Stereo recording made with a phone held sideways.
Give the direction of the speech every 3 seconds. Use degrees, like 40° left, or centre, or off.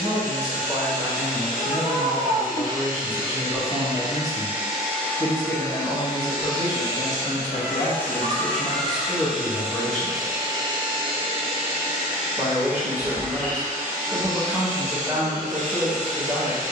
10° right, 20° left, 50° left, 10° left, 20° right, 20° right.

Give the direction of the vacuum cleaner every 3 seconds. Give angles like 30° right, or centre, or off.
50° right, 10° right, 20° left, 30° right, 50° right, 50° right.